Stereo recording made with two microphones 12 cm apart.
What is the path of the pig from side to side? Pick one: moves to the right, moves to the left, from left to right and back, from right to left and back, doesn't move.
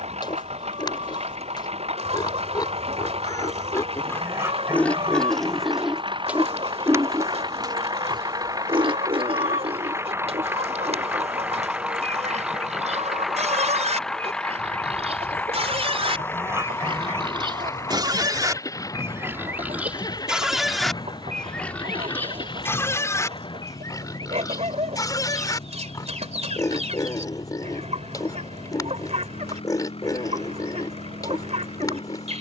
from left to right and back.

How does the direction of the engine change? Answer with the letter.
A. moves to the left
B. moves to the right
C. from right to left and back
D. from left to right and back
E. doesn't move
A.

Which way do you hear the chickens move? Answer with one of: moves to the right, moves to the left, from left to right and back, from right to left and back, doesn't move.
doesn't move.